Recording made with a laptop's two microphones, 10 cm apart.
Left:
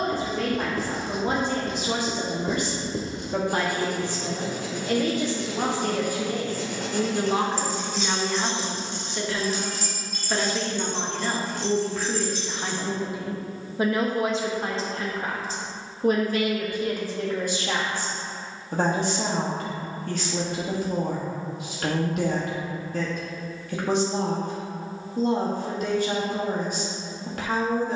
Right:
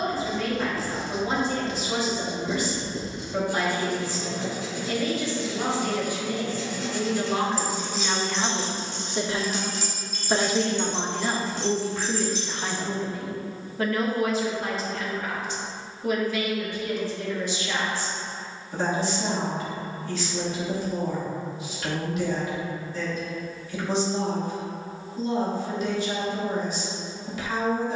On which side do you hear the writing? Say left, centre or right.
left.